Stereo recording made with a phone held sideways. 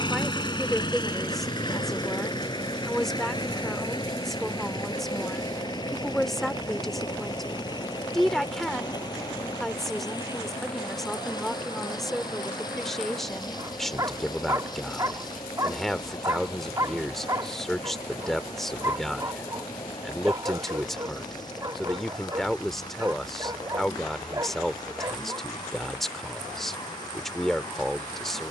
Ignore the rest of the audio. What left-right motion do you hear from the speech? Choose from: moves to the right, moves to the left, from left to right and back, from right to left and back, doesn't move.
doesn't move.